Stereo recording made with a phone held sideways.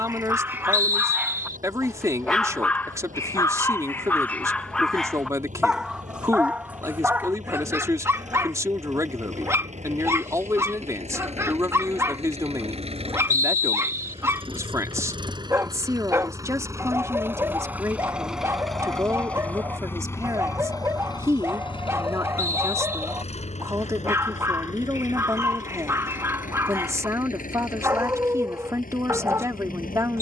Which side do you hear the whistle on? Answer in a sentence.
You can hear the whistle on the right.